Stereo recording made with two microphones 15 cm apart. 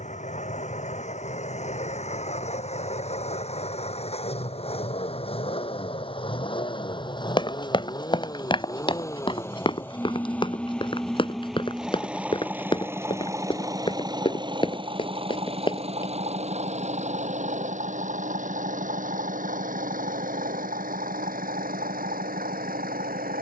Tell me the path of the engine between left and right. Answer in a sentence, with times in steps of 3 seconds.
You can hear the engine on the left from 0 s, in the centre from 9 s and on the right from 12 s.